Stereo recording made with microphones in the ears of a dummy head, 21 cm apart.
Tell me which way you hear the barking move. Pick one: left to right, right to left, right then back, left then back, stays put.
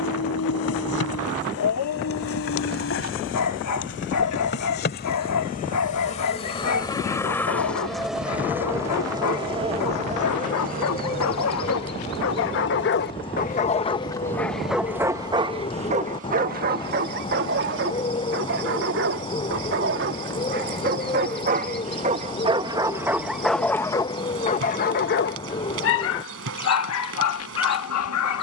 right then back.